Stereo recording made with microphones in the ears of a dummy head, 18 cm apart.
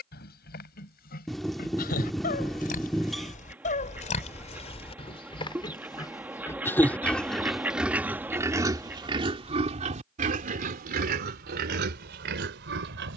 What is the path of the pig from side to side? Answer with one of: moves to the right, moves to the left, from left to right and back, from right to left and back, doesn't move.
moves to the right.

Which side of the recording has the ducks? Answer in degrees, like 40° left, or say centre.
10° right.